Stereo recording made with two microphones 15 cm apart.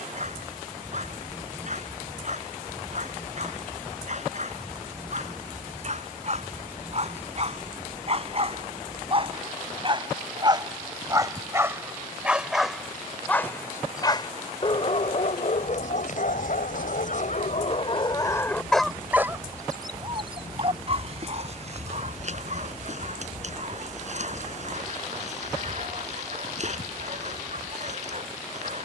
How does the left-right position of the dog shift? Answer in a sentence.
In this clip you hear the dog move from right to left and back again.